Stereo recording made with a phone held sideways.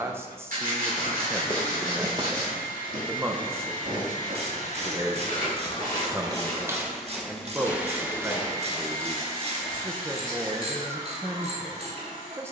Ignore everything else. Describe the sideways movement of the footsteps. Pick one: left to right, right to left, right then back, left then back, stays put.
right then back.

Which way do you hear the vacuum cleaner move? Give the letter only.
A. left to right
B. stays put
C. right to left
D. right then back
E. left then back
A.